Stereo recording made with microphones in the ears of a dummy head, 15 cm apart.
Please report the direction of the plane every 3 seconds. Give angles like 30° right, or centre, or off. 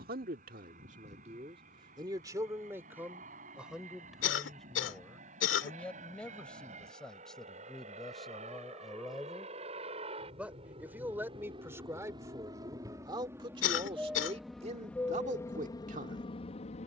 60° right, 50° right, 50° right, 40° right, 10° right, 30° left.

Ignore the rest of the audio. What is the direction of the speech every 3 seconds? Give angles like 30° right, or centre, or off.
40° right, centre, centre, 10° right, 30° right, 50° right.